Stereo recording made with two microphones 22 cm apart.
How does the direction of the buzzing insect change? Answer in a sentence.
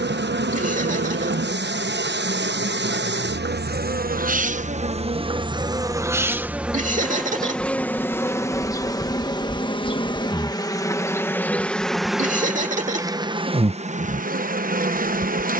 In this clip you hear the buzzing insect move from right to left and back again.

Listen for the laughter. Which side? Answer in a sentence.
In this clip you hear the laughter on the right.